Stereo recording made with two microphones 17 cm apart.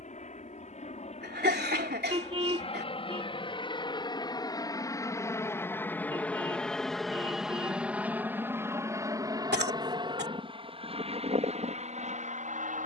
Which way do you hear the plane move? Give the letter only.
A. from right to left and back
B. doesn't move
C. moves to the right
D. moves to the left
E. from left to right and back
C.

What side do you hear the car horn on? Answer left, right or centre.
right.